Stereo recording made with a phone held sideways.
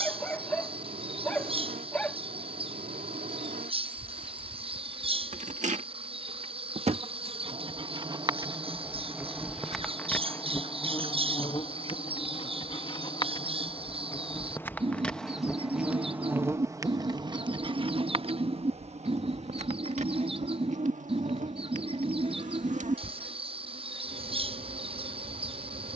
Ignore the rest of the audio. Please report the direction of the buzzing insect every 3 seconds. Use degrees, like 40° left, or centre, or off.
70° right, 70° right, 40° right, 20° left, 30° left, 20° right, 60° right, 70° right, 70° right.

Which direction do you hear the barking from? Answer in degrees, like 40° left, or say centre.
10° left.